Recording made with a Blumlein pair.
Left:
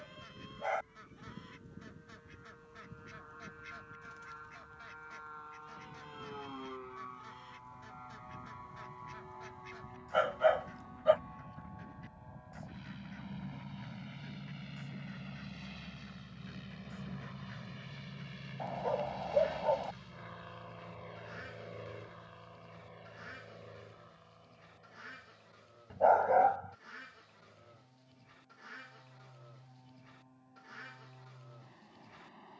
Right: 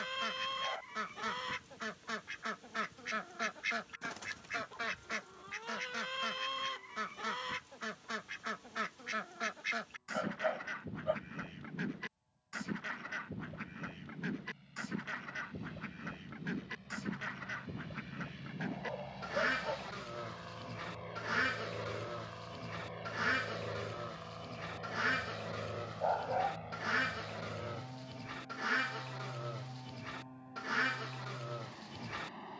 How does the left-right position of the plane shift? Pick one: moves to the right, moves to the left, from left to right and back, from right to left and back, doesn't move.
moves to the right.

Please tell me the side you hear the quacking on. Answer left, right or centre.
right.